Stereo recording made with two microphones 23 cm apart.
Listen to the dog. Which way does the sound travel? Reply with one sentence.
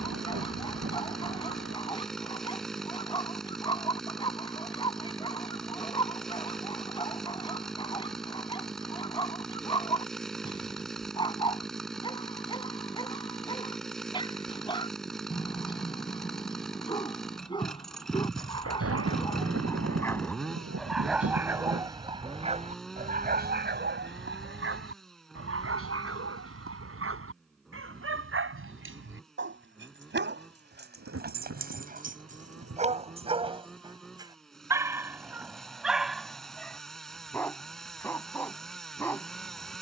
In this clip you hear the dog go right and come back.